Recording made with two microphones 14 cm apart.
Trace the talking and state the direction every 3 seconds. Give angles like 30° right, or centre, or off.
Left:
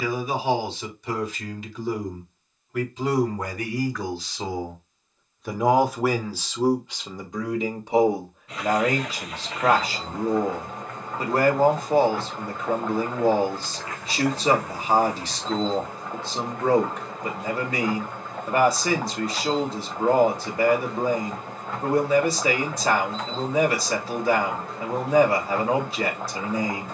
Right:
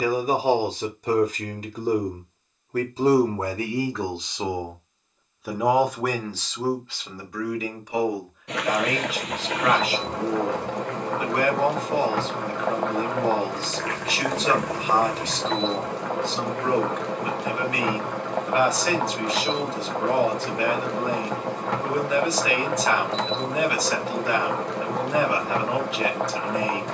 40° right, 20° right, 20° left, 30° left, 30° left, 30° left, 30° left, 30° left, 30° left.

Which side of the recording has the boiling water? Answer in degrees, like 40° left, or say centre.
80° right.